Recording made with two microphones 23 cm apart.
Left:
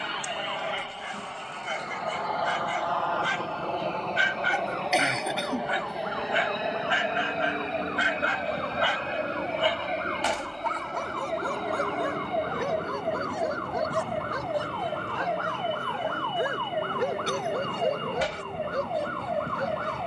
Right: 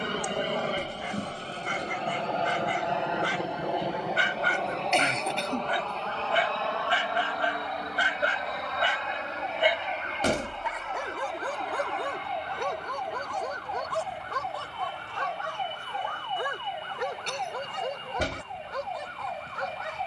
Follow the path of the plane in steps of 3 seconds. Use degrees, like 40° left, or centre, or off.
40° right, centre, 20° left, 40° left, 40° left, 50° left, 50° left.